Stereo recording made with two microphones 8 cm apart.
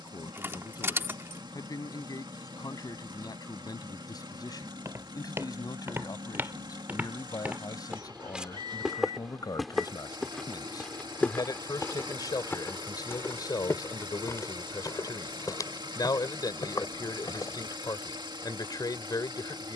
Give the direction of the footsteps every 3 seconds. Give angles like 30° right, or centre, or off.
off, 40° right, 20° right, 10° left, 30° left, 50° left, off.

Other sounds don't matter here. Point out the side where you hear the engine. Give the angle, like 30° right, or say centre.
80° right.